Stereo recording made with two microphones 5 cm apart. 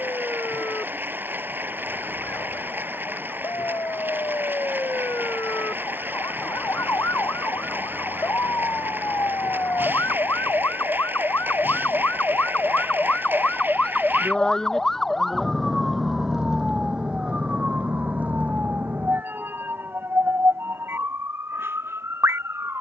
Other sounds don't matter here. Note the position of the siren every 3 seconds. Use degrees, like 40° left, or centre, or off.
80° left, 70° left, 70° left, 50° left, 30° left, 10° right, 40° right, 50° right.